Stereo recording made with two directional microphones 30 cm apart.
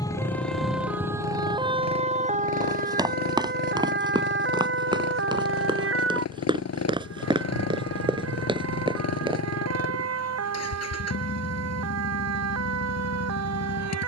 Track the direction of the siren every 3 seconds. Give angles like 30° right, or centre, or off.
10° right, 40° right, 50° right, 50° right, 50° right.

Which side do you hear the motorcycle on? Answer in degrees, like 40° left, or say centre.
50° left.